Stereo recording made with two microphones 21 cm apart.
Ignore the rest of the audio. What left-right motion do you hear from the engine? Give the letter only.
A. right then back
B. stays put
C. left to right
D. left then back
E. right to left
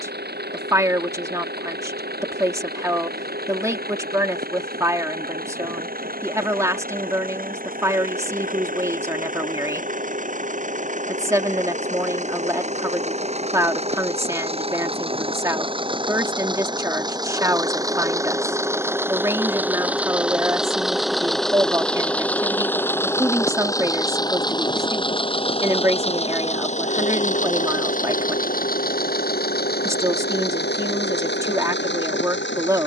E.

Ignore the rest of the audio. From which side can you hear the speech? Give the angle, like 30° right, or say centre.
20° right.